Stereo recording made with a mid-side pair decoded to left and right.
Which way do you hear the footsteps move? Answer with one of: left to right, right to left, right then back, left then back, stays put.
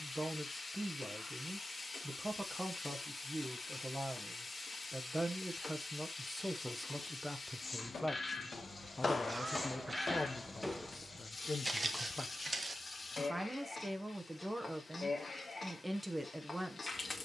left to right.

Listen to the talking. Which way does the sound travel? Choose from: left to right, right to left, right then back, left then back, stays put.
left then back.